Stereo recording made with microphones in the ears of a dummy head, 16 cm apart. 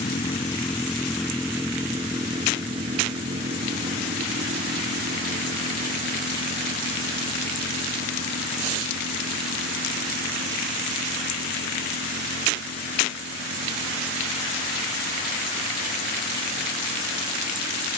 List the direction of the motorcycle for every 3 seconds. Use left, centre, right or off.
centre, right, right, right, right, right.